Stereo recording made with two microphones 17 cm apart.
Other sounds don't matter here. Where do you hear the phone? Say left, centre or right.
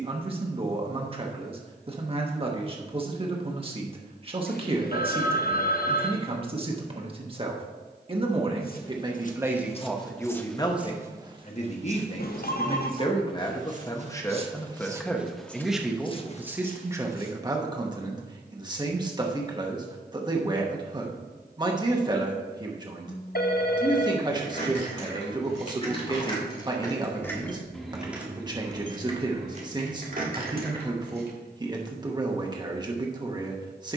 left.